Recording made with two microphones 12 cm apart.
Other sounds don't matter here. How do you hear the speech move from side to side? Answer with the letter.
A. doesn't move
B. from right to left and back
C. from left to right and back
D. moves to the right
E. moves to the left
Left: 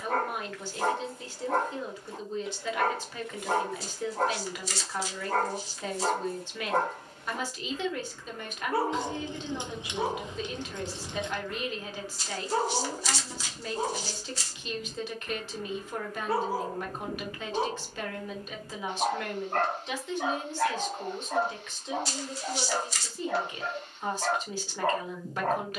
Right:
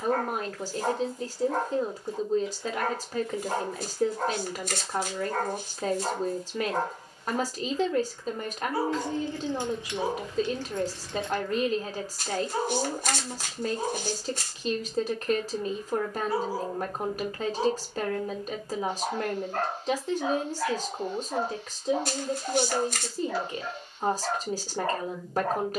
A.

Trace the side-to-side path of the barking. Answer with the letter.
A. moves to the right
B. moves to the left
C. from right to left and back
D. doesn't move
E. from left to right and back
D.